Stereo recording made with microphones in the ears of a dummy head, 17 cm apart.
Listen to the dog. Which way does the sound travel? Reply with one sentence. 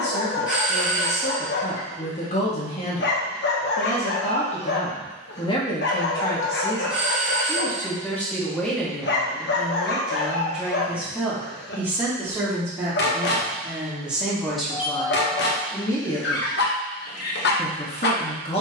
You can hear the dog stay put.